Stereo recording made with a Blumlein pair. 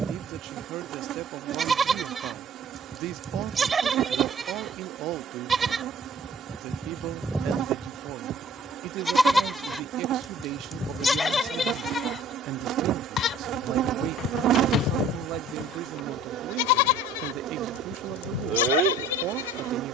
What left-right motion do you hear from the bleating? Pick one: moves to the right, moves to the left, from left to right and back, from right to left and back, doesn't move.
moves to the left.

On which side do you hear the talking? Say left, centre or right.
right.